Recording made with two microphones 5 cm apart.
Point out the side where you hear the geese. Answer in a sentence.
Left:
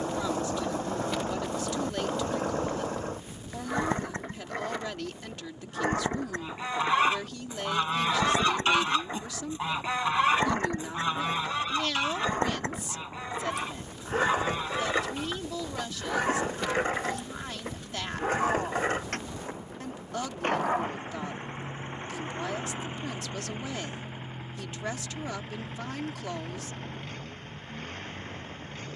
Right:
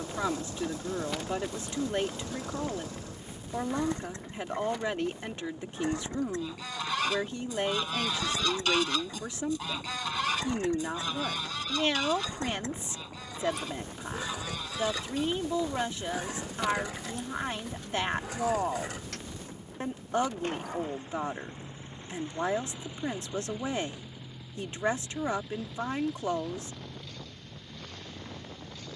You can hear the geese on the left.